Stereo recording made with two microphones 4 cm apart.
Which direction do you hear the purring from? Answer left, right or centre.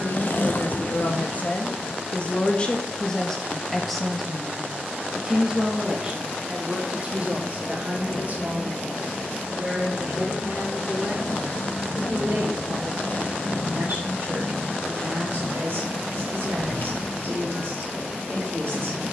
left.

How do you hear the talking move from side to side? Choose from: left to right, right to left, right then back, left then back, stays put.
left to right.